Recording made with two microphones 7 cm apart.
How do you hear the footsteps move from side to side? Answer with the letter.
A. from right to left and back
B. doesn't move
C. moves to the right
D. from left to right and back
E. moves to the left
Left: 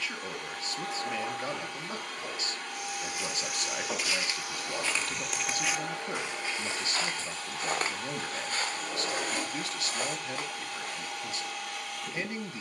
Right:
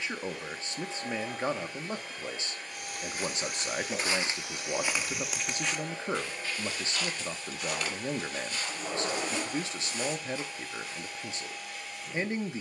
E.